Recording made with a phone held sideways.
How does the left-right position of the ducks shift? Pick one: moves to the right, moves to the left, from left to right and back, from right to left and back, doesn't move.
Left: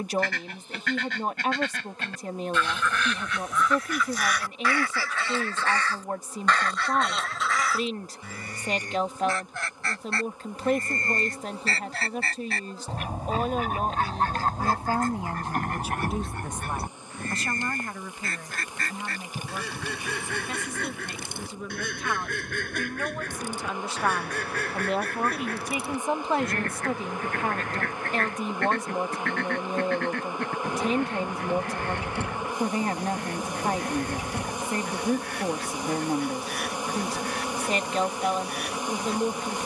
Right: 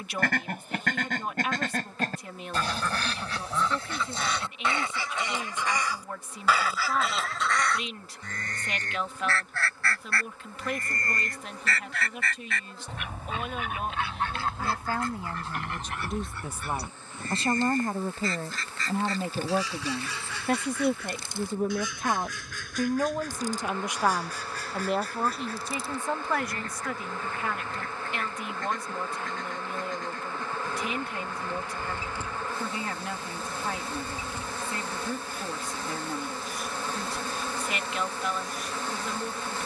moves to the left.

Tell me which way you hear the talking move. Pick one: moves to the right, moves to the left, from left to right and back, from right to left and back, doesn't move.
from left to right and back.